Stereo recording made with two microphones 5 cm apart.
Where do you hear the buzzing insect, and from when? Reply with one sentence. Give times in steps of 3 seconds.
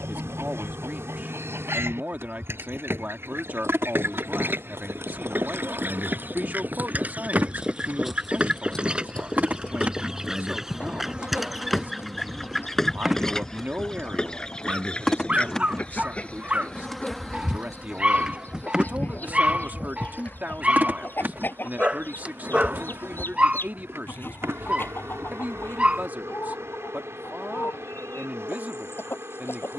You can hear the buzzing insect on the right from 0 s, in the centre from 12 s and on the right from 18 s.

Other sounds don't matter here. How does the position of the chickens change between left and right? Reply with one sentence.
You can hear the chickens move from right to left.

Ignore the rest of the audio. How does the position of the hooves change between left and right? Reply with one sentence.
You can hear the hooves move from right to left.